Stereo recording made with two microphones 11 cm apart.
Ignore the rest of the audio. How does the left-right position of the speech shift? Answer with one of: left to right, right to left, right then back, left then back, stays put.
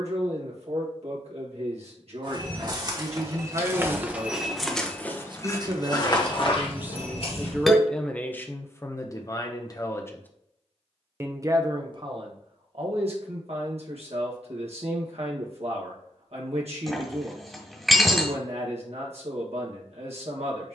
left then back.